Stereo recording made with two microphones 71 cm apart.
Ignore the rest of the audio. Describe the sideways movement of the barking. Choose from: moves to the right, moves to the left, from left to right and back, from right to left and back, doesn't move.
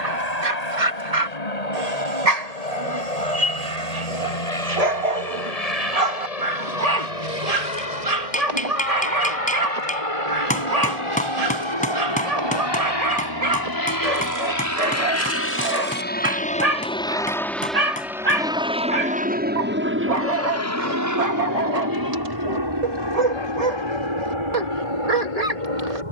doesn't move.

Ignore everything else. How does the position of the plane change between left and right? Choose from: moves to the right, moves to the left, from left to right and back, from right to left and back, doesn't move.
moves to the right.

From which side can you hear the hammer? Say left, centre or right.
centre.